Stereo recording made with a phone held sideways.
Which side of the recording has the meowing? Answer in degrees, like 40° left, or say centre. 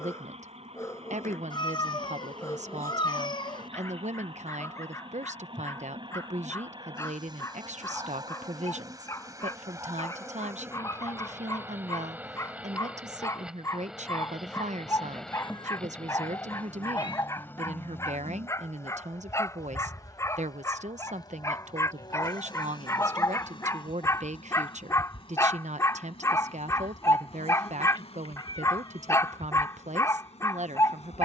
30° left.